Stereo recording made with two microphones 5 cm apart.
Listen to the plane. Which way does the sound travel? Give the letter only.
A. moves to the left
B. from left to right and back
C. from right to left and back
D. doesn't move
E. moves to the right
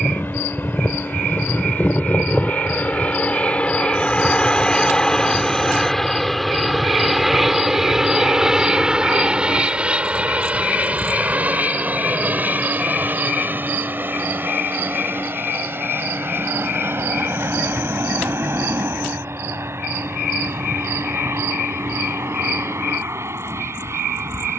E.